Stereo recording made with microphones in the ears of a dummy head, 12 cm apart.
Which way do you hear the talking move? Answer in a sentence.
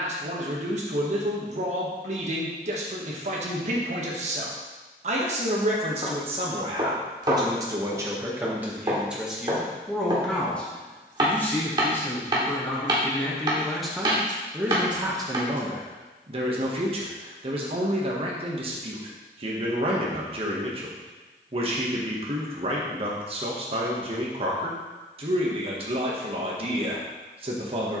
You can hear the talking go left and come back.